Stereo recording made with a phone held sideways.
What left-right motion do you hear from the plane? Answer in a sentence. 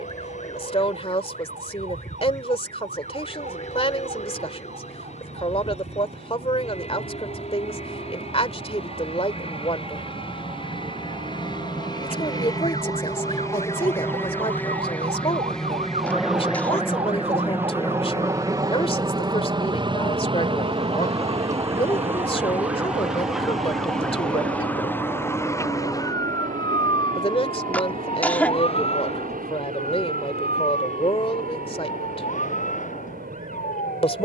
You can hear the plane go from the left side to the right.